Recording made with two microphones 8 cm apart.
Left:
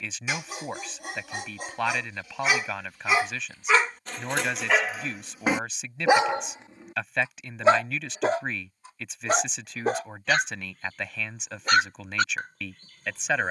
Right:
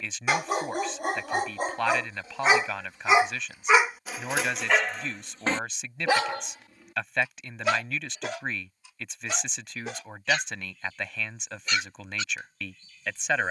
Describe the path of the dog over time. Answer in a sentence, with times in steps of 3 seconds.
In this clip you hear the dog on the right from 0 s, in the centre from 3 s and on the left from 6 s.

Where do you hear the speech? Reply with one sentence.
In this clip you hear the speech in the centre.